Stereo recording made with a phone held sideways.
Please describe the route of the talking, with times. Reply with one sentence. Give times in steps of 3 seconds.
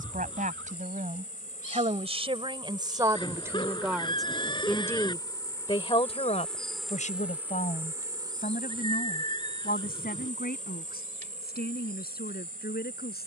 In this clip you hear the talking on the right from 0 s, in the centre from 3 s and on the left from 6 s.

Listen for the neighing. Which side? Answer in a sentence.
In this clip you hear the neighing on the left.